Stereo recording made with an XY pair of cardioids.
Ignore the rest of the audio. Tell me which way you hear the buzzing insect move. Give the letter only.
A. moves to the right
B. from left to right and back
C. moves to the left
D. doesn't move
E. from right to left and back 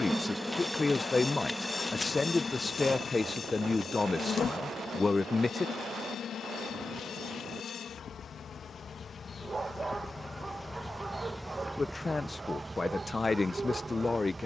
E.